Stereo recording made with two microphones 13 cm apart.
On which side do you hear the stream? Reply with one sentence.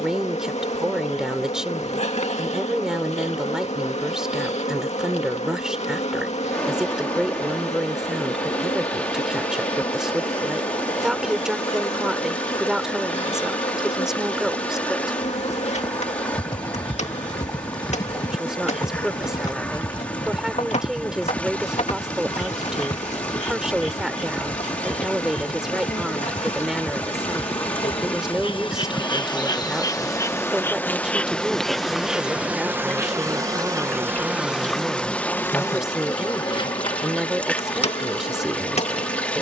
In this clip you hear the stream in the centre.